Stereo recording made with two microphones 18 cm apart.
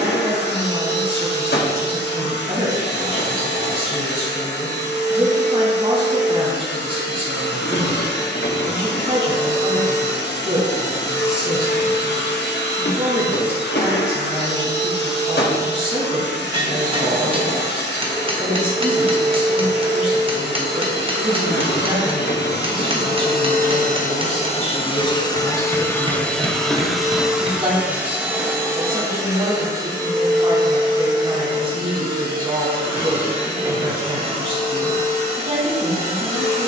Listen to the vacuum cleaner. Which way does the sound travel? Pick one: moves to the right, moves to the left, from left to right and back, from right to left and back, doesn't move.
moves to the right.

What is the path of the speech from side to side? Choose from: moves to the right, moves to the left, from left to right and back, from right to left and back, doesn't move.
doesn't move.